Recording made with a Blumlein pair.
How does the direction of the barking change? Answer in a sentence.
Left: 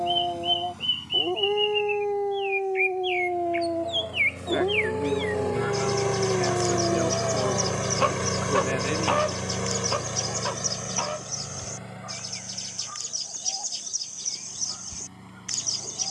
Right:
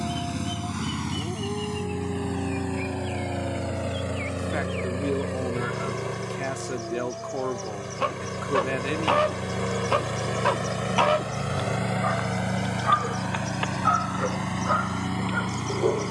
You can hear the barking move to the right.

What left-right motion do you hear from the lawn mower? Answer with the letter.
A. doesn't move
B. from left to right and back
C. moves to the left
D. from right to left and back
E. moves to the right
D.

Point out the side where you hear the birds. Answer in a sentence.
In this clip you hear the birds on the left.